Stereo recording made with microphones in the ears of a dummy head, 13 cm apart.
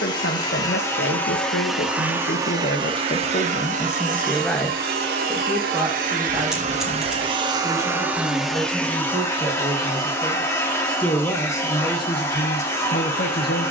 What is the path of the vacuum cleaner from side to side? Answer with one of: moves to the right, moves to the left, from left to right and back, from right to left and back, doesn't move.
from left to right and back.